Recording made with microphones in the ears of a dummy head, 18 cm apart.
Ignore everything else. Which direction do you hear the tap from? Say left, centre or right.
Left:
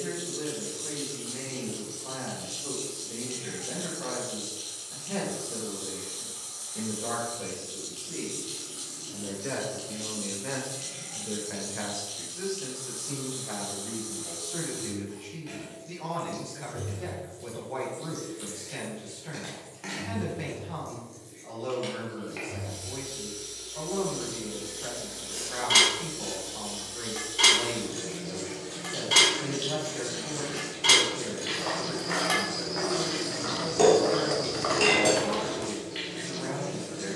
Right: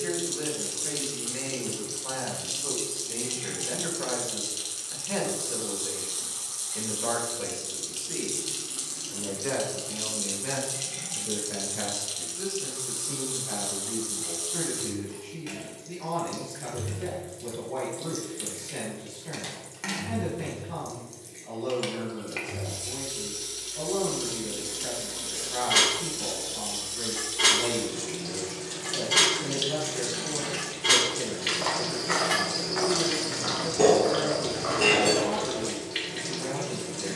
right.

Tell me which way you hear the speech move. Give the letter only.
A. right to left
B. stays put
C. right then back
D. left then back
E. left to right
A.